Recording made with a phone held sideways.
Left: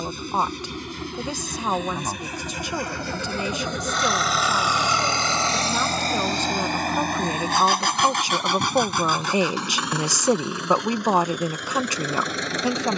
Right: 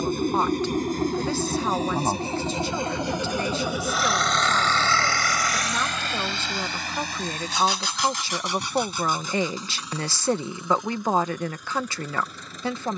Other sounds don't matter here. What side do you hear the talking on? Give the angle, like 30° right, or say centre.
20° left.